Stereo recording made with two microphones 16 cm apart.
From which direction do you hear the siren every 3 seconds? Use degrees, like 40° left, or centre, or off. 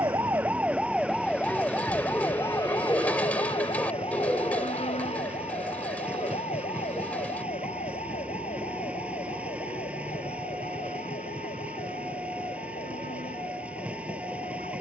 10° left, 40° left, 50° left, 50° left, 60° left.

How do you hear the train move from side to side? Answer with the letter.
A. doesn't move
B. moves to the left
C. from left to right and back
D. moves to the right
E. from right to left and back
A.